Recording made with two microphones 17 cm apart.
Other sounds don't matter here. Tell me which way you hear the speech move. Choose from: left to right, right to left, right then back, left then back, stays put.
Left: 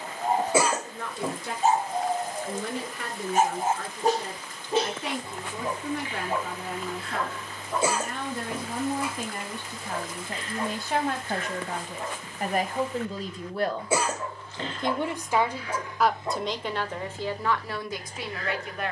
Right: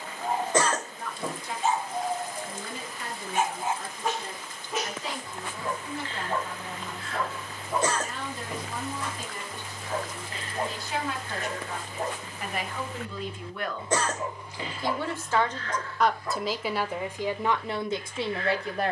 left to right.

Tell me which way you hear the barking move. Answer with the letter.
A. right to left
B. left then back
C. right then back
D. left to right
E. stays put
C.